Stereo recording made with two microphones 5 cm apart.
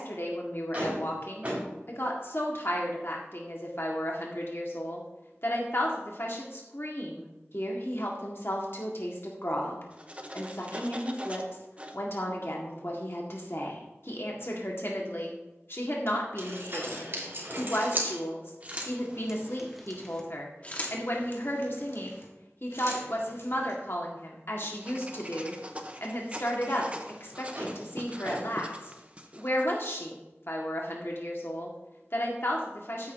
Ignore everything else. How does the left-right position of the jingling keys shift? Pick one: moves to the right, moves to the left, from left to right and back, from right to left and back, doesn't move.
moves to the left.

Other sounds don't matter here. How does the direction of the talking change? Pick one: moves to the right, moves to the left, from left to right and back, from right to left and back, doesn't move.
doesn't move.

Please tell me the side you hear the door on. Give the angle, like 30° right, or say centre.
30° right.